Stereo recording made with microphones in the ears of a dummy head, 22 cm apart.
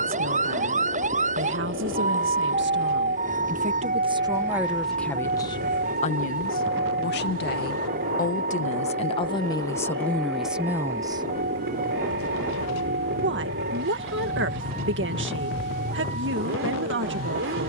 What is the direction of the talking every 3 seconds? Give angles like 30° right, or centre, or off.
50° right, 10° right, 40° left, centre, 50° right, 50° right.